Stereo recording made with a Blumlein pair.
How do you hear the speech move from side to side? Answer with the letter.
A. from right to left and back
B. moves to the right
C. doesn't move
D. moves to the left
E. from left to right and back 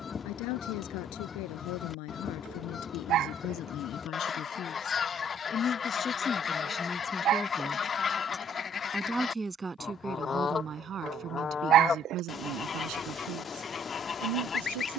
B.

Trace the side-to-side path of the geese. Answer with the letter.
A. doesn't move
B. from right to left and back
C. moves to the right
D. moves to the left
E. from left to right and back
A.